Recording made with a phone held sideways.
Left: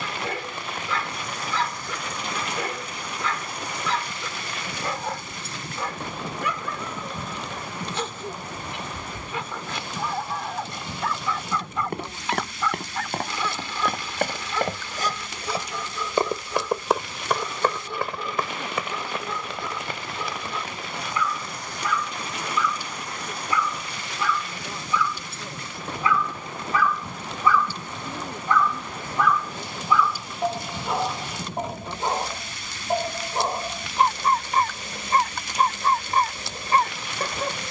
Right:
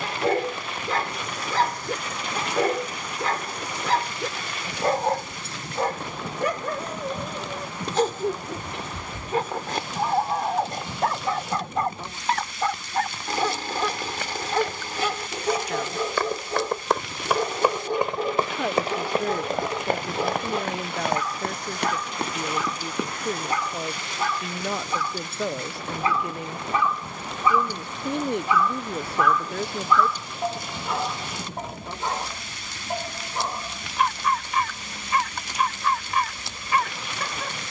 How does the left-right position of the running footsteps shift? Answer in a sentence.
You can hear the running footsteps move from left to right.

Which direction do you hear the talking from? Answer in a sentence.
You can hear the talking on the right.